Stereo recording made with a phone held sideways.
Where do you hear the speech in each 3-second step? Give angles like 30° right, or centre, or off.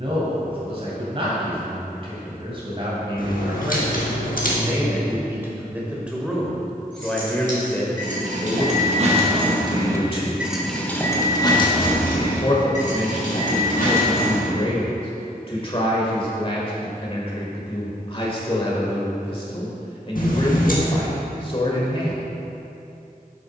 40° right, 20° right, 10° left, 40° left, 40° left, 40° left, 40° left, 40° left.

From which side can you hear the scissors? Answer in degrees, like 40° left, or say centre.
70° left.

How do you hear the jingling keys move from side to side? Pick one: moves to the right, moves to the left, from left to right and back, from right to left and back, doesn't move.
moves to the left.